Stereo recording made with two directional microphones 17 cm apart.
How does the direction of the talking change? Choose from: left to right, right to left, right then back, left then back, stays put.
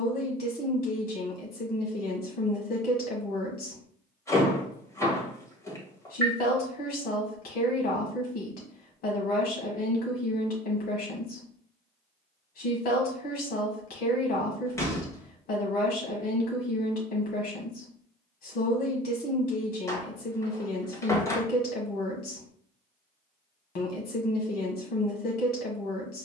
stays put.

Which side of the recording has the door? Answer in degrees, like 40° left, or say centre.
20° left.